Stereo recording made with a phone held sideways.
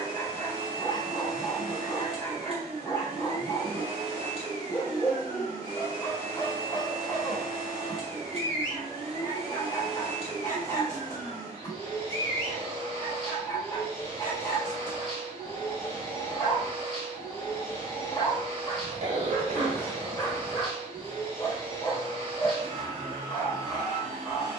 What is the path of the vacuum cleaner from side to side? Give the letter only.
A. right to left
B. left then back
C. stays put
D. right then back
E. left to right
C.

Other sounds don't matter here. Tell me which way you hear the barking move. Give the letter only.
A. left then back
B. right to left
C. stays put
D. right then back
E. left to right
C.